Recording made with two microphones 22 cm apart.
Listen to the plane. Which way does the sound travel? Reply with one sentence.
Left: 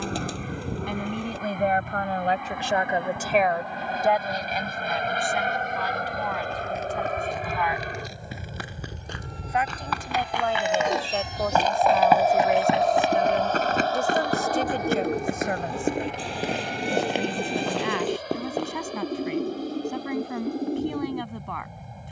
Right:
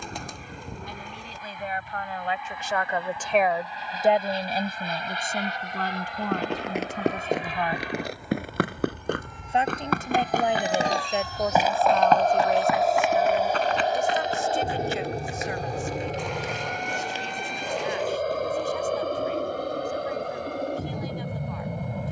In this clip you hear the plane move from left to right.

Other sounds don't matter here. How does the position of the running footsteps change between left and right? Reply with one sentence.
You can hear the running footsteps travel towards the left.